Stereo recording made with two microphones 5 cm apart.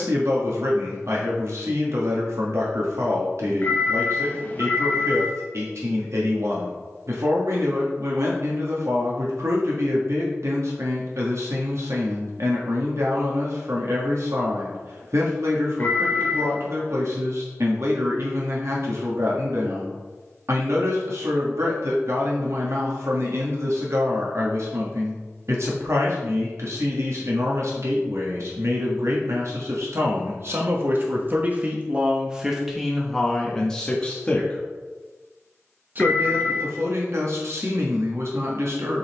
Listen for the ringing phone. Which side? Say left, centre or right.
left.